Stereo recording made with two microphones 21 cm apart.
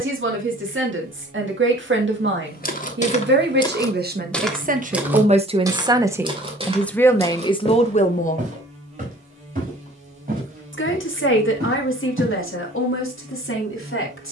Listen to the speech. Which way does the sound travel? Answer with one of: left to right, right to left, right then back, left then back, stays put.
right to left.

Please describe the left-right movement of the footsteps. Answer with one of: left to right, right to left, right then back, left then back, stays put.
left to right.